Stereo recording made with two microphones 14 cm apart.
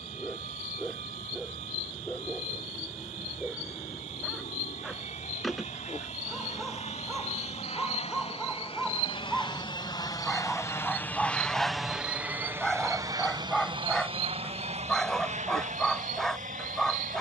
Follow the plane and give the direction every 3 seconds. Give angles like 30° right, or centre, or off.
70° left, 70° left, 50° left, 20° left, 30° right, 60° right.